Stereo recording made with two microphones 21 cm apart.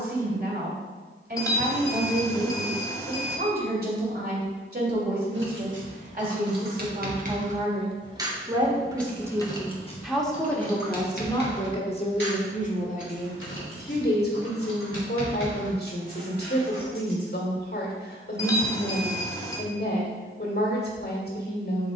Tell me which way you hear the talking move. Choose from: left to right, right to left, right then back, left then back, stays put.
right to left.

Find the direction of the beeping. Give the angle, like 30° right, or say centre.
10° left.